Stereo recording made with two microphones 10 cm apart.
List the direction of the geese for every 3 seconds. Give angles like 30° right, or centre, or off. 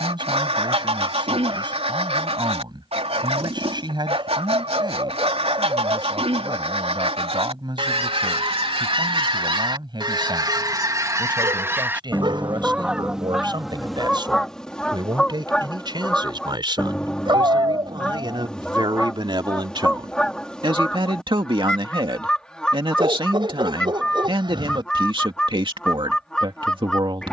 80° right, 80° right, 70° right, 40° right, centre, 10° left, 10° left, 10° left, 10° left.